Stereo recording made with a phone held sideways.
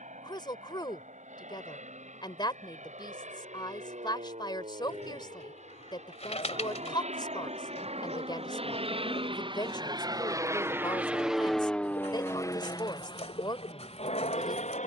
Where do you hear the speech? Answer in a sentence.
You can hear the speech on the left.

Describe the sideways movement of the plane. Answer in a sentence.
You can hear the plane move to the left.